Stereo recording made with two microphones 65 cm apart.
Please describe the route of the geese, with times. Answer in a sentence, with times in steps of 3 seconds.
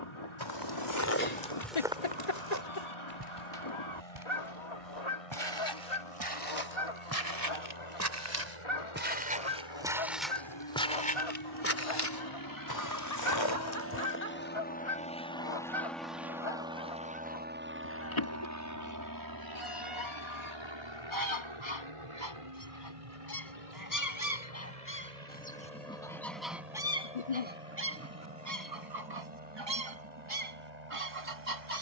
In this clip you hear the geese on the left from 0 s, in the centre from 24 s and on the right from 27 s.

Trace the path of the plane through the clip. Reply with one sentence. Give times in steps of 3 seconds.
You can hear the plane on the left from 0 s, in the centre from 15 s and on the right from 18 s.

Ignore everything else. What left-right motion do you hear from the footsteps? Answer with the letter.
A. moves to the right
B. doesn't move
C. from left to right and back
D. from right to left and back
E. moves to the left
C.